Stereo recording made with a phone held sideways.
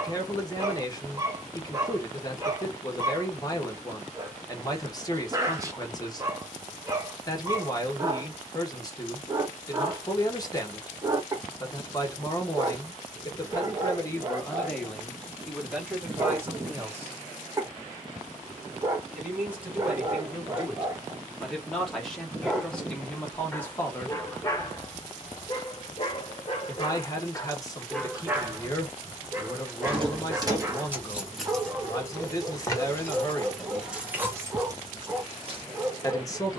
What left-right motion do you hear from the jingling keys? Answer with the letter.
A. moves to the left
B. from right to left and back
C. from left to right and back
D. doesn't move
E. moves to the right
B.